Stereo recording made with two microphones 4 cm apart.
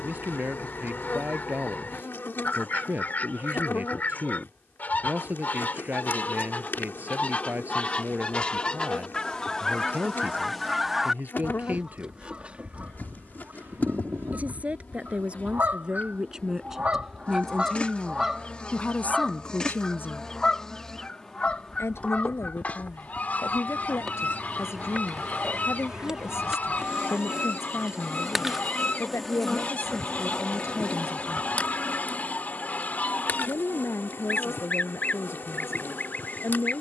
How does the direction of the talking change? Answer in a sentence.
You can hear the talking move to the left.